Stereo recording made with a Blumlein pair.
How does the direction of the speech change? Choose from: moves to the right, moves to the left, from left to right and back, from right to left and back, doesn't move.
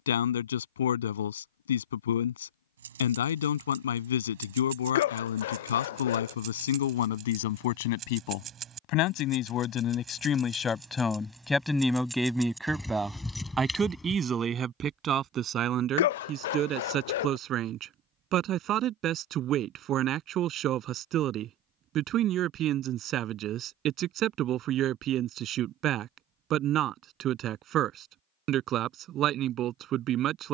moves to the right.